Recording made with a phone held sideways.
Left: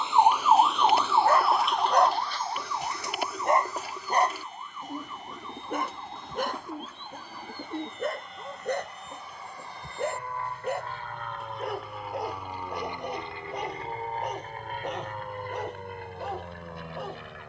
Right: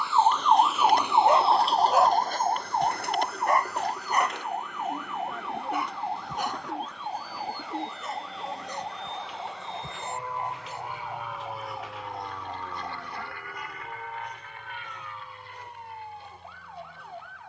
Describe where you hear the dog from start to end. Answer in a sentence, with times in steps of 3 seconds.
You can hear the dog in the centre from 0 s and on the left from 3 s.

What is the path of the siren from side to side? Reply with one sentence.
You can hear the siren travel towards the right.